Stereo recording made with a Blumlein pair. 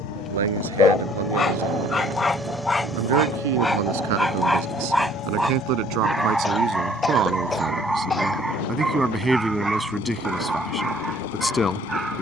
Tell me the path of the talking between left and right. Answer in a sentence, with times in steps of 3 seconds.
In this clip you hear the talking on the right from 0 s and in the centre from 9 s.